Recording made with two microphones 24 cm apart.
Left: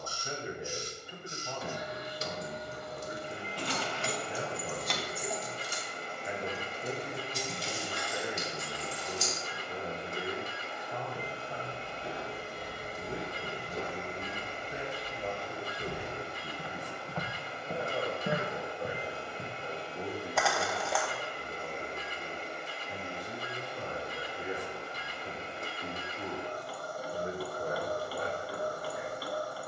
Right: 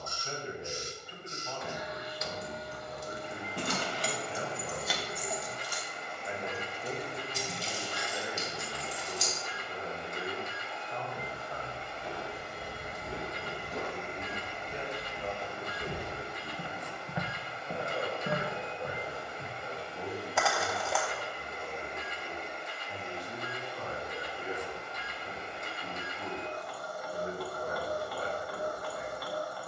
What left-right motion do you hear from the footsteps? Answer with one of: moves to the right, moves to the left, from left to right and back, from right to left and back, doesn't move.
from left to right and back.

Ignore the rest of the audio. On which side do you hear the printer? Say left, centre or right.
left.